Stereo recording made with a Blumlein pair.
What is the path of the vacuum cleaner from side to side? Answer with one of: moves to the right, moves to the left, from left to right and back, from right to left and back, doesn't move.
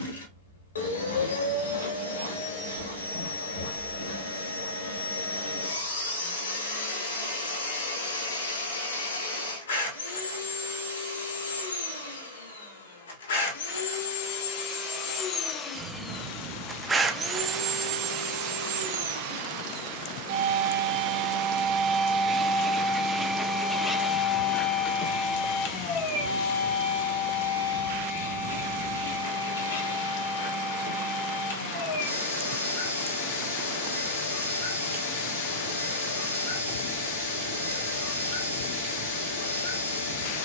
from left to right and back.